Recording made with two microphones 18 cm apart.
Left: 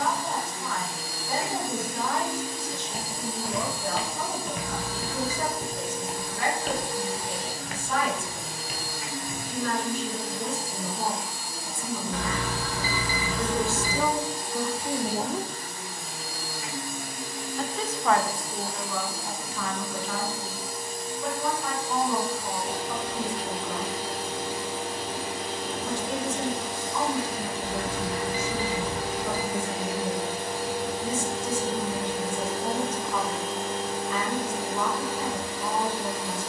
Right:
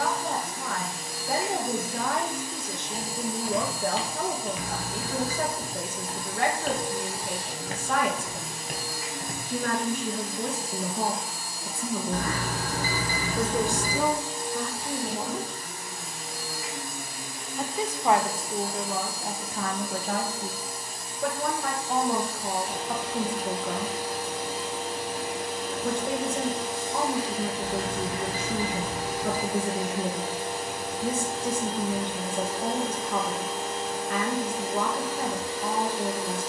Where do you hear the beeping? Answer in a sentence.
In this clip you hear the beeping on the right.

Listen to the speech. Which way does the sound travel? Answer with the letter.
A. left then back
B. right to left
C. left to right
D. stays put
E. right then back
A.